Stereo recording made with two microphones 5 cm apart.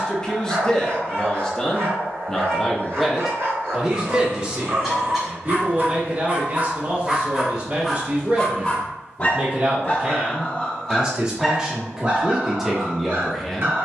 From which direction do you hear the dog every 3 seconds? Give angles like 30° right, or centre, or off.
60° right, 60° right, 10° right, 20° left, 50° right.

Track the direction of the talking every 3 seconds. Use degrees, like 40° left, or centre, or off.
10° left, 20° right, 40° right, 20° right, centre.